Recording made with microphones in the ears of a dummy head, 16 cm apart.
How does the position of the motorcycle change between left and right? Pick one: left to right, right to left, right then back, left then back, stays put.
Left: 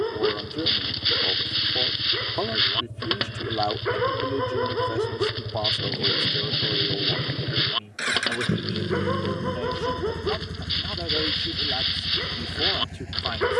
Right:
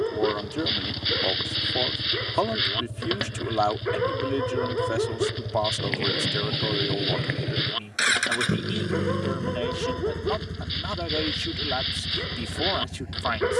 right to left.